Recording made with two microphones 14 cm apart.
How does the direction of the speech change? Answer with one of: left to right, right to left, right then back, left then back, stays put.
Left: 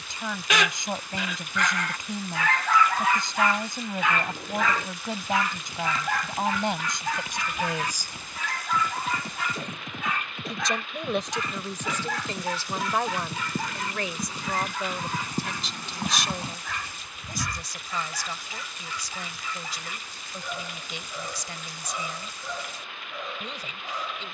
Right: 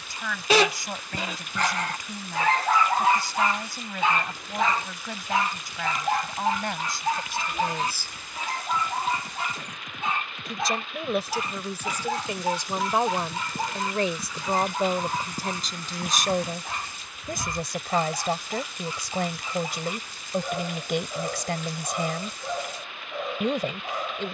left to right.